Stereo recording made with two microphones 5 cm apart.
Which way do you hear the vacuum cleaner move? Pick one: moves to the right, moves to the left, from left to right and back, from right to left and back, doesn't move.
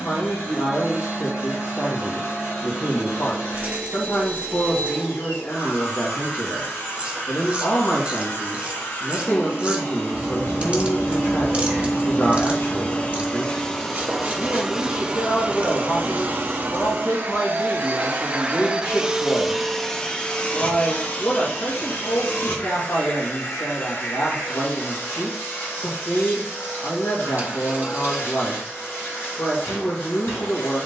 from left to right and back.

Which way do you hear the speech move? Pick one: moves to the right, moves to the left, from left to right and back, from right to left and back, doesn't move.
doesn't move.